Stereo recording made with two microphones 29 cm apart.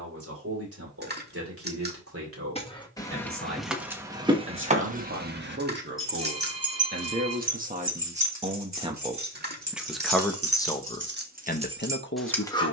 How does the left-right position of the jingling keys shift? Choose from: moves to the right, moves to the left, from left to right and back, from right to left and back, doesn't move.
from left to right and back.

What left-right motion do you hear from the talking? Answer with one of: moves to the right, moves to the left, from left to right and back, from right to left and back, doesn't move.
moves to the left.